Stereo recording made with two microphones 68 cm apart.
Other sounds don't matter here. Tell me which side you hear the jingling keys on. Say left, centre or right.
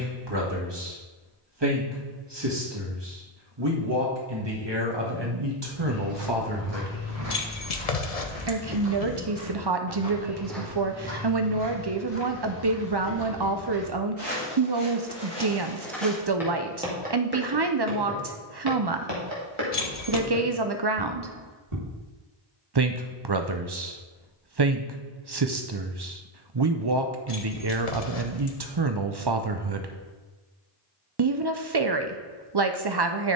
left.